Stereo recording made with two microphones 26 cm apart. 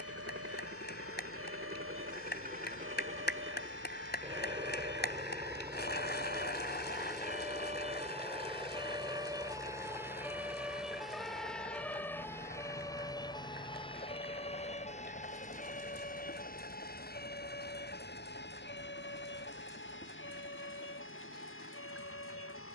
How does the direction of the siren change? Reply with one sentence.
In this clip you hear the siren move from right to left.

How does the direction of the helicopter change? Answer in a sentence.
In this clip you hear the helicopter move from right to left.